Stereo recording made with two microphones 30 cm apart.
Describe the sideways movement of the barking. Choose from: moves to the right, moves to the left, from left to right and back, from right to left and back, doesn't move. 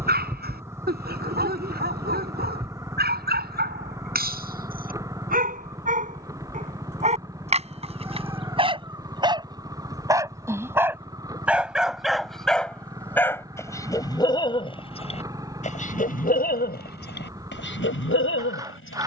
moves to the left.